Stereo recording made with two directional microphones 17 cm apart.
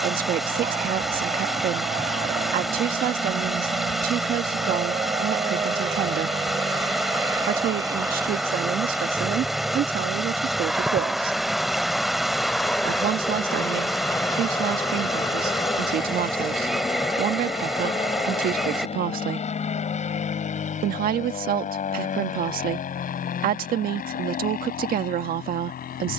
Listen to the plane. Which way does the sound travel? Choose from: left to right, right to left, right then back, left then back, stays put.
right to left.